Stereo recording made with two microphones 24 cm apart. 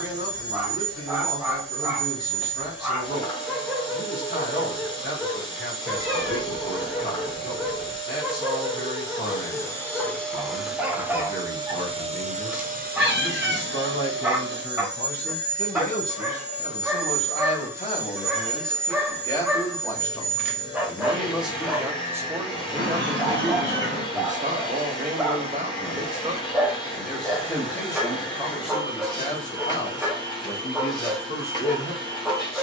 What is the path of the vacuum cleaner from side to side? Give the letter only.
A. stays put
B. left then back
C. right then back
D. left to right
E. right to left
C.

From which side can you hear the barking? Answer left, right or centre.
centre.